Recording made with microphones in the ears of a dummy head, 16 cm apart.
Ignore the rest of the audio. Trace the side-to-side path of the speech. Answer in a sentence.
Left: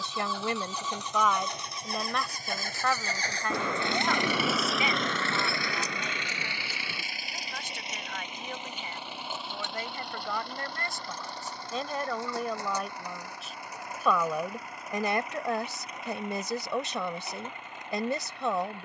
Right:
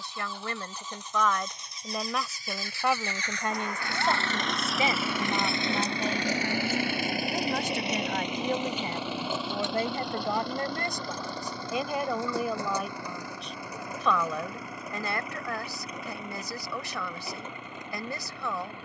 You can hear the speech move from left to right and back again.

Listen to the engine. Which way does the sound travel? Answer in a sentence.
In this clip you hear the engine move to the right.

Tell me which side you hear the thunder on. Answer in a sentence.
In this clip you hear the thunder on the left.